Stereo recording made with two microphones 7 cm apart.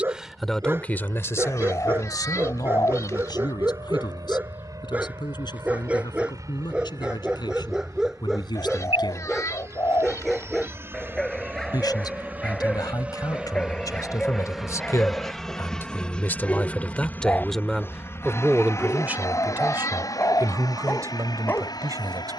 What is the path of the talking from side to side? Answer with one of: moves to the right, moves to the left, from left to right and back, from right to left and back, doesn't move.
from right to left and back.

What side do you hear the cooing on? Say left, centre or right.
left.